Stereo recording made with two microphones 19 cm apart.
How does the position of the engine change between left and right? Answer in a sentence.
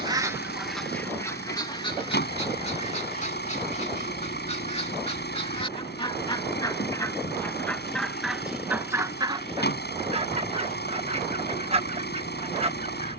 You can hear the engine stay put.